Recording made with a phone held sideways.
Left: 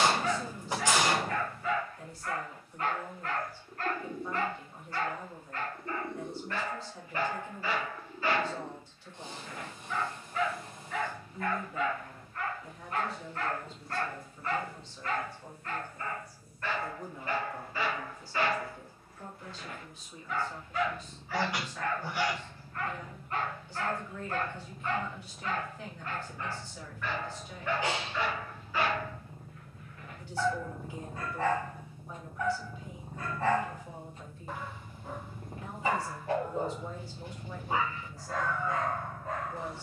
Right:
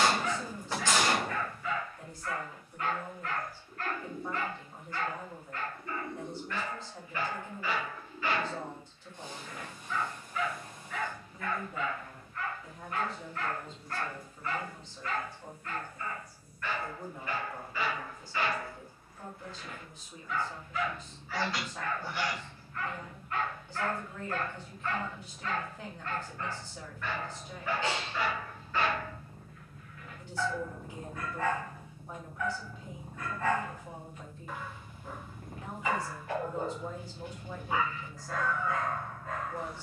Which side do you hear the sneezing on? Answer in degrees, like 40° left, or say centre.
20° left.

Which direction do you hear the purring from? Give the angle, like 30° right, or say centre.
20° left.